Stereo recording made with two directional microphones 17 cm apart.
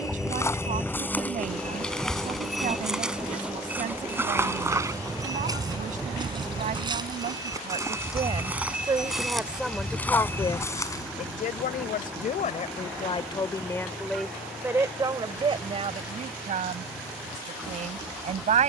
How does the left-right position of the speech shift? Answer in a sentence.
In this clip you hear the speech move from right to left and back again.